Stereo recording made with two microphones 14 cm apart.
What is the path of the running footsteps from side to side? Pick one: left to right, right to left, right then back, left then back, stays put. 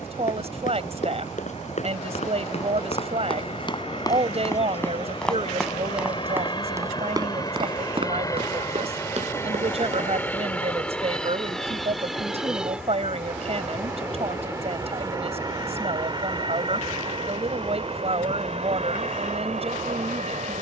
left to right.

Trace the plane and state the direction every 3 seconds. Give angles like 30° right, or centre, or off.
50° left, 40° left, 30° left, 10° left, 10° right, 30° right, 50° right.